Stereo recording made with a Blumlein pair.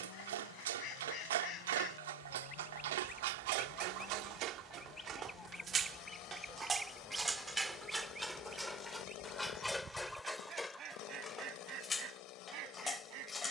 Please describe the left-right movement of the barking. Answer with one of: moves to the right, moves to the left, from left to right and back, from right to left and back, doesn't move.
moves to the left.